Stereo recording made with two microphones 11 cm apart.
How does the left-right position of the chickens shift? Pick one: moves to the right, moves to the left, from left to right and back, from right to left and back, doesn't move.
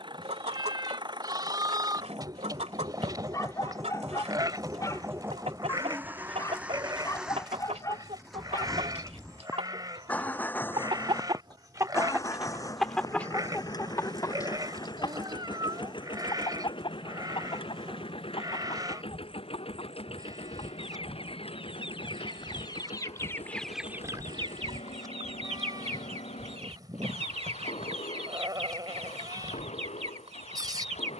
from right to left and back.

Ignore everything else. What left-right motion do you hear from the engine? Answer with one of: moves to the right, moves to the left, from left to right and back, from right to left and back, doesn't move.
moves to the left.